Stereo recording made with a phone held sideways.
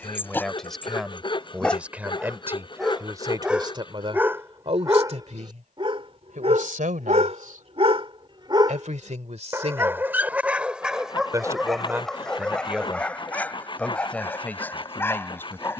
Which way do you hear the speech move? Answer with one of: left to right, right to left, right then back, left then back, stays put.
right then back.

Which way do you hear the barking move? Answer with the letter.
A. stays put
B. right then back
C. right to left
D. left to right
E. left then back
B.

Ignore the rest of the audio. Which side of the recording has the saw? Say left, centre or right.
left.